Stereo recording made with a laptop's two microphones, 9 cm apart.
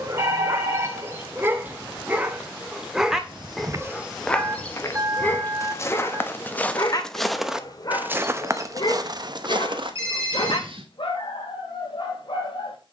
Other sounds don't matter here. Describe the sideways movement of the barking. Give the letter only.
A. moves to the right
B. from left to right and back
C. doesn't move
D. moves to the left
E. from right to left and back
D.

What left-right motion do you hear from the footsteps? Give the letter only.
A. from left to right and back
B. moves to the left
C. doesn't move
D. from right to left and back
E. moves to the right
D.